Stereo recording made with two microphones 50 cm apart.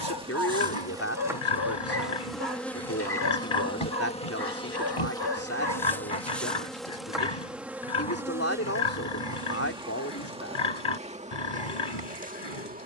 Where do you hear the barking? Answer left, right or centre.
left.